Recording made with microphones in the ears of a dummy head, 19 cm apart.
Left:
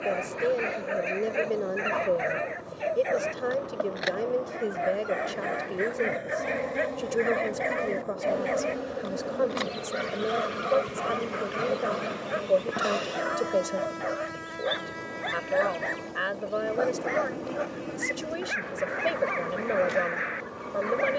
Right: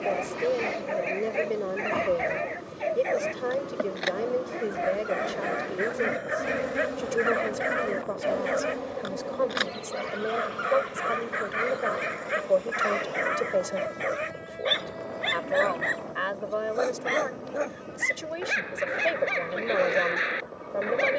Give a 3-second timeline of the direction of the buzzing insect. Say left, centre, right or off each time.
right, right, centre, left, left, left, left.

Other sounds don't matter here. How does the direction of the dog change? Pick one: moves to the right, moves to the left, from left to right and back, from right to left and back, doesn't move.
moves to the right.